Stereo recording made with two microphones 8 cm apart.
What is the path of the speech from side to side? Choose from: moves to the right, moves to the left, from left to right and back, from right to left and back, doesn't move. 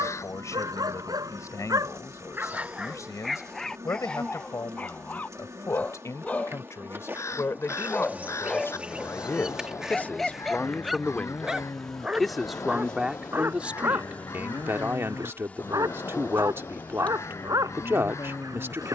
moves to the right.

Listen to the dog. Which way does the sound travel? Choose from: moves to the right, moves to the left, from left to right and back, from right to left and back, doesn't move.
from right to left and back.